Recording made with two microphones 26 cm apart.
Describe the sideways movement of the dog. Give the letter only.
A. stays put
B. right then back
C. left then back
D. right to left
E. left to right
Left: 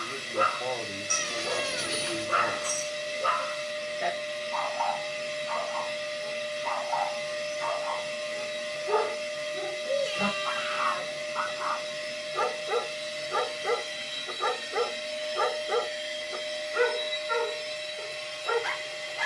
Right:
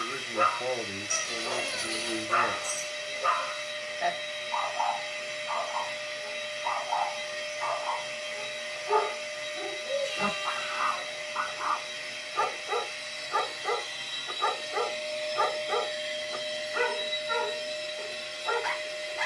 A.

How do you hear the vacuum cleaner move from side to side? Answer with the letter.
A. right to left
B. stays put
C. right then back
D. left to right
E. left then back
D.